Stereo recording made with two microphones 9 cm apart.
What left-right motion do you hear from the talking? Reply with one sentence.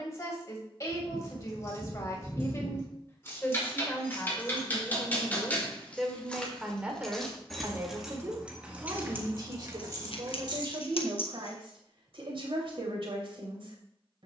You can hear the talking move from left to right.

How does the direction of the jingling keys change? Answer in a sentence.
You can hear the jingling keys travel towards the right.